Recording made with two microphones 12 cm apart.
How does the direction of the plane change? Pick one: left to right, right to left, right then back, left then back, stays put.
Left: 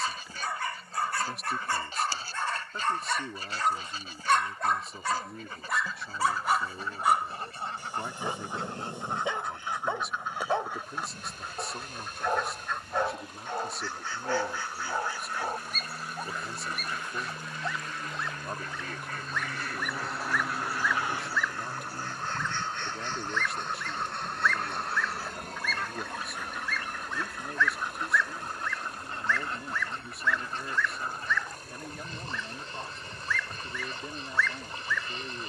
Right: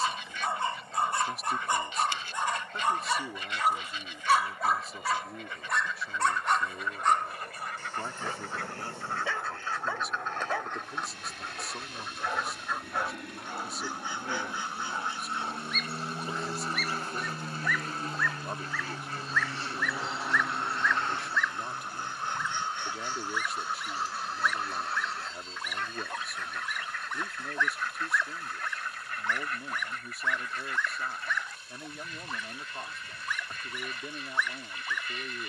right to left.